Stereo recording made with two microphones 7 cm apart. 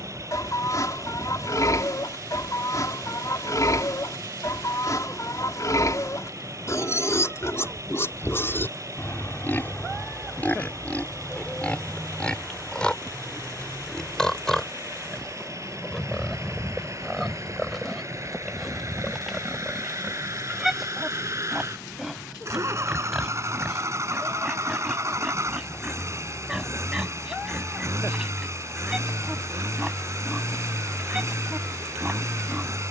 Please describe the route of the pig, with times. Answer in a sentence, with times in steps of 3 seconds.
You can hear the pig on the left from 0 s and in the centre from 12 s.